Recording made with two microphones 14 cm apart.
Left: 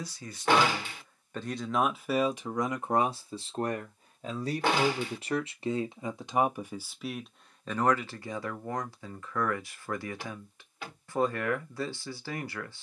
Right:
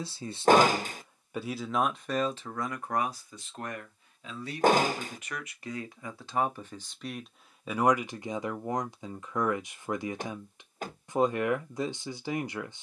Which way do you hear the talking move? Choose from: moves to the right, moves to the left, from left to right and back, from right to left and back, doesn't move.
from right to left and back.